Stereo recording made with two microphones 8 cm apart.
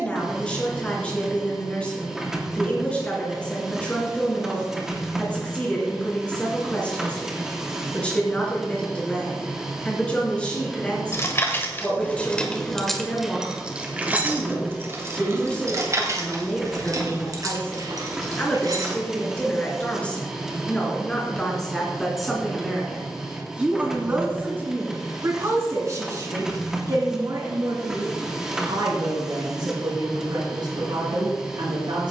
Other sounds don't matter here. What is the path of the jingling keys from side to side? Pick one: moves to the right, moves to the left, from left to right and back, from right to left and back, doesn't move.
moves to the right.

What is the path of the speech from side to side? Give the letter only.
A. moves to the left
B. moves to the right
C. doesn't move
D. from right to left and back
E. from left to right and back
B.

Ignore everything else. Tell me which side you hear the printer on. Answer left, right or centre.
centre.